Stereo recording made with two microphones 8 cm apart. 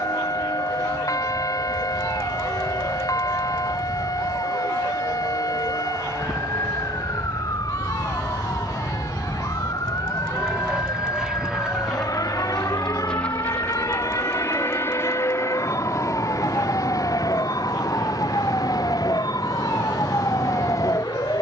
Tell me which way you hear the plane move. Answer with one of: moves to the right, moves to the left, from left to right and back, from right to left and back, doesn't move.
moves to the left.